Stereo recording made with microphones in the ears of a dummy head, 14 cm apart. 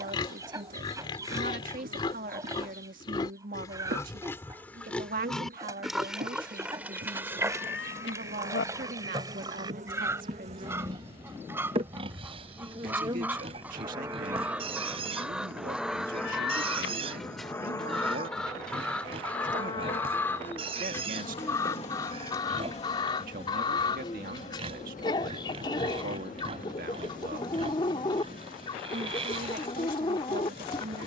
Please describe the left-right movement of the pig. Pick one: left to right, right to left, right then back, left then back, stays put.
left to right.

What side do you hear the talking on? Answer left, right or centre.
right.